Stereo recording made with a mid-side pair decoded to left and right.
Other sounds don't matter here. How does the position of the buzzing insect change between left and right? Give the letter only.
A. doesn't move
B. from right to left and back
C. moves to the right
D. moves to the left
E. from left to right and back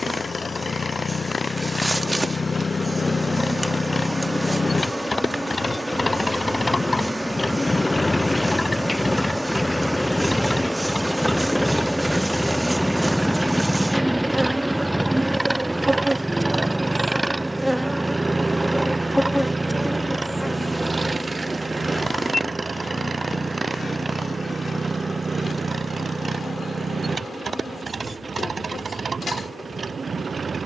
D.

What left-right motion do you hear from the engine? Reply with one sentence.
You can hear the engine travel towards the right.